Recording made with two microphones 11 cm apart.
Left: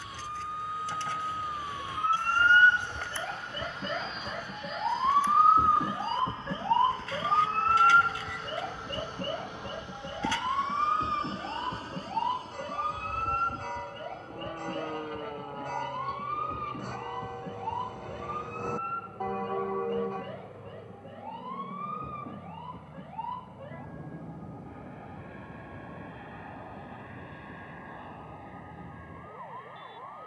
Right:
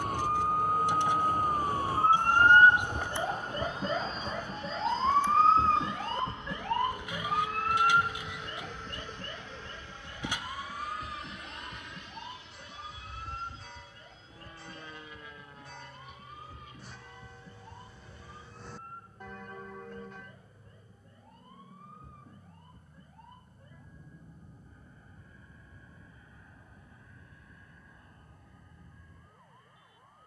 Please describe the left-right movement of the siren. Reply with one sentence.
You can hear the siren move from right to left.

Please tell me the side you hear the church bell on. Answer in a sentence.
In this clip you hear the church bell on the left.